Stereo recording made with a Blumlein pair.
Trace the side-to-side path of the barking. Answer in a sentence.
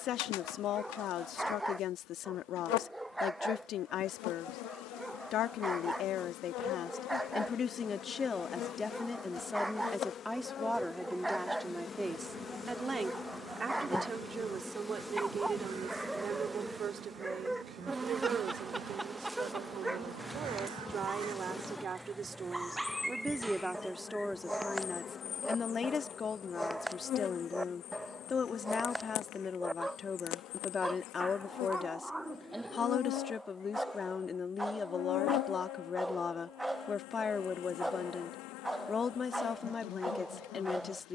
You can hear the barking stay in one place.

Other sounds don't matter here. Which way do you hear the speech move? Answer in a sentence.
In this clip you hear the speech go right and come back.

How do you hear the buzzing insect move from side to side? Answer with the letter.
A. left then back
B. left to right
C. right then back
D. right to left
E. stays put
C.